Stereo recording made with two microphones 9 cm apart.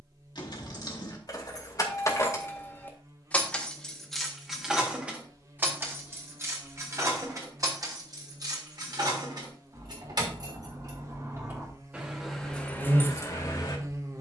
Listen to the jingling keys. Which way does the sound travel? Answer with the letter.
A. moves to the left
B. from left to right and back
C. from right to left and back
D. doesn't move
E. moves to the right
B.